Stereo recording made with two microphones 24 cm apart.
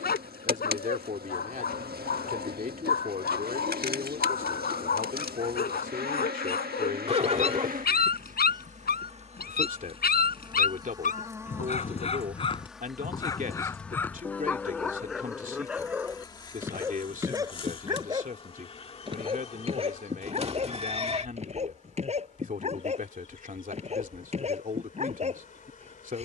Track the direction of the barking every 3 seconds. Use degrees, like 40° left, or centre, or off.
40° left, 40° left, 40° left, 40° left, 10° left, 10° right, 20° right, 30° right, 30° right.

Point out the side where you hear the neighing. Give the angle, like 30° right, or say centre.
30° right.